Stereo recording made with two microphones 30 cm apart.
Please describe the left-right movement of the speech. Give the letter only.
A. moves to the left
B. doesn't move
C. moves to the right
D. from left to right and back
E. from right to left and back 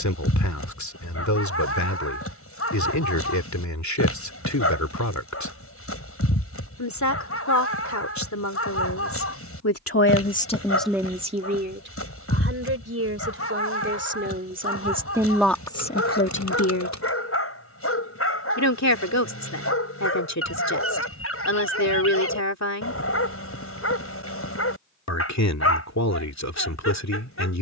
D.